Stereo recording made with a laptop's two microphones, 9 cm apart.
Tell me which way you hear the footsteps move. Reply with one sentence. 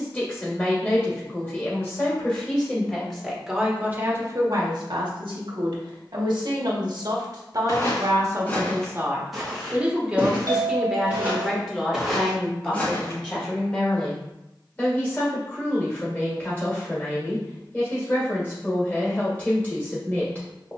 In this clip you hear the footsteps go right and come back.